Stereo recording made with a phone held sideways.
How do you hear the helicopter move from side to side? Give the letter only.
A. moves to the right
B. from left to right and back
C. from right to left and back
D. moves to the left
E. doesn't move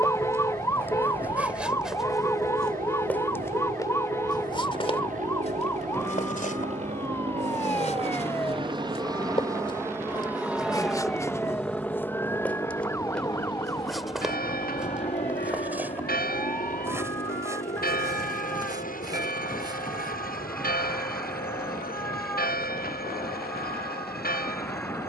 D.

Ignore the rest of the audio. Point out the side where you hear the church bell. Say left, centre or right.
left.